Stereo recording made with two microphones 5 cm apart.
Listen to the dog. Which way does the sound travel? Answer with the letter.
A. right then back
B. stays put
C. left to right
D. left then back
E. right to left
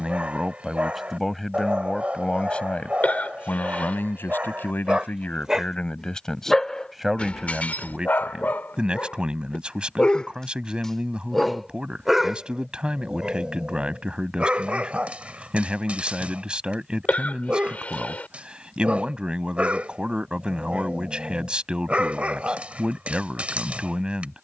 D.